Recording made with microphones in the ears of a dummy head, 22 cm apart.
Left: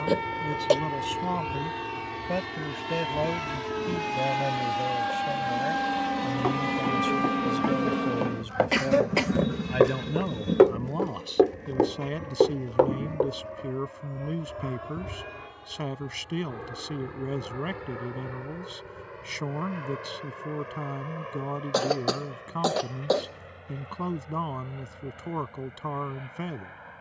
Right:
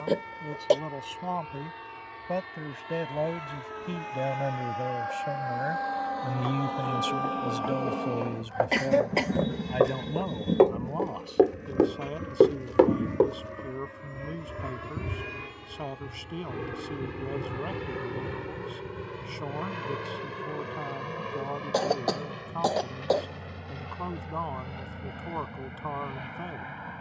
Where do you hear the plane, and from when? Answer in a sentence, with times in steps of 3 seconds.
In this clip you hear the plane on the left from 0 s, in the centre from 9 s and on the right from 12 s.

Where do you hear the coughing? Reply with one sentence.
In this clip you hear the coughing in the centre.